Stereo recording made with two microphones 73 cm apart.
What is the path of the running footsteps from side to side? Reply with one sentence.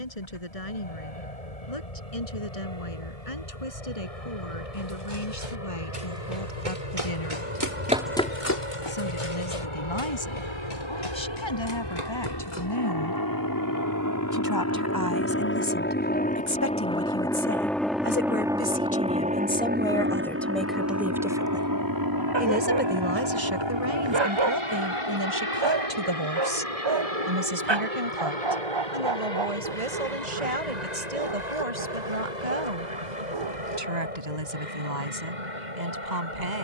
In this clip you hear the running footsteps move from right to left.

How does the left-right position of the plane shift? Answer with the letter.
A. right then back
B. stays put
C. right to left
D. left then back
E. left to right
E.